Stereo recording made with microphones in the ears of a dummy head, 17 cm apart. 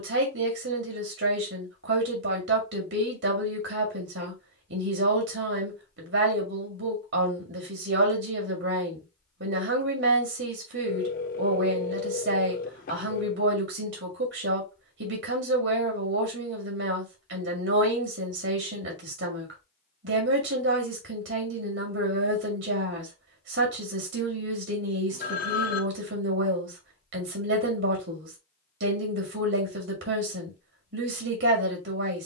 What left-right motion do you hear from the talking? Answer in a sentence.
In this clip you hear the talking stay put.